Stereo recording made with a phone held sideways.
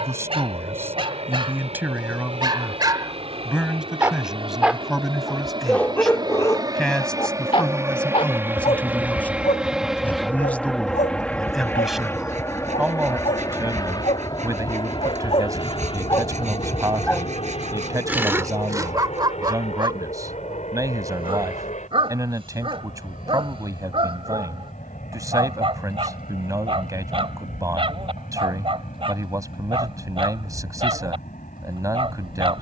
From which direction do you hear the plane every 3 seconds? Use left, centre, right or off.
right, right, right, centre, left, left, left, left, left, left, left.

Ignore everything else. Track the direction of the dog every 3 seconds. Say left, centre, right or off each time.
right, centre, left, left, left, left, right, right, right, right, right.